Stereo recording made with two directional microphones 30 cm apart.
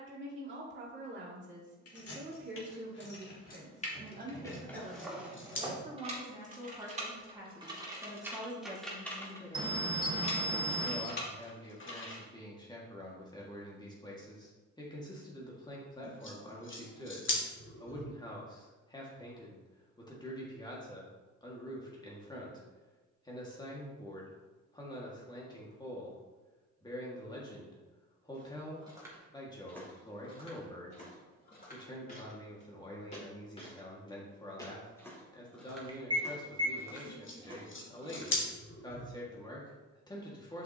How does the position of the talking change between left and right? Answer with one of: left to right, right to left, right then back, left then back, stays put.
right to left.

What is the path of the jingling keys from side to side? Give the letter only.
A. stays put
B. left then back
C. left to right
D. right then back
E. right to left
D.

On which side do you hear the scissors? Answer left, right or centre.
left.